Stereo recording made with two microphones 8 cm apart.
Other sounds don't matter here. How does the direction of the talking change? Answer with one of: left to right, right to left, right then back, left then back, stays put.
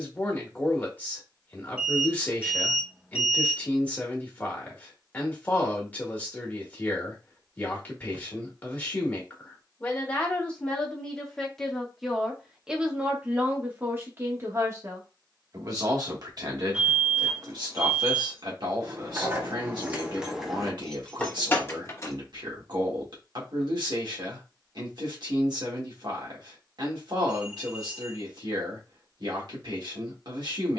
left to right.